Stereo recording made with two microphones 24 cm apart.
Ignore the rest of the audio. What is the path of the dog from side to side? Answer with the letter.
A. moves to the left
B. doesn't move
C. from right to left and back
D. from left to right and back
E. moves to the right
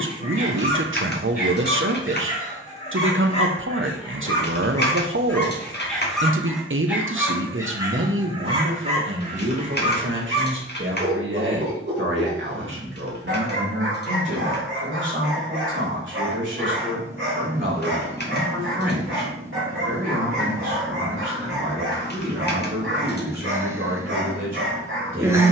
E.